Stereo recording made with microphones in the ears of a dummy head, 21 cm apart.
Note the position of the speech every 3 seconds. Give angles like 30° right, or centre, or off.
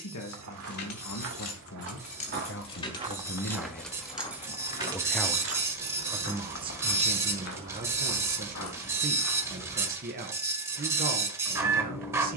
60° left, 20° left, 30° right, 40° right.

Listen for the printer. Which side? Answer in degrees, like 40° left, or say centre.
10° right.